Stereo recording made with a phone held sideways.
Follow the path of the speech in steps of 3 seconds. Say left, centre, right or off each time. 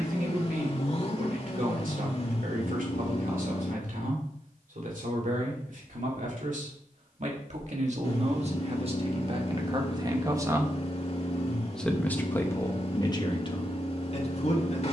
right, right, right, right, left.